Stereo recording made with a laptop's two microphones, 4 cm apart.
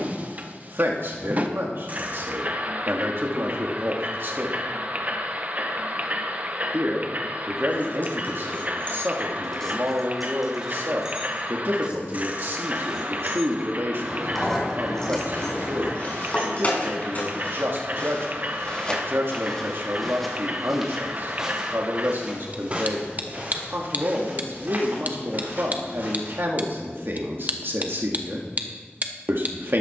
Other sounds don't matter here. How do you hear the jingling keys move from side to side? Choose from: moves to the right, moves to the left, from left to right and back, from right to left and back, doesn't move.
from left to right and back.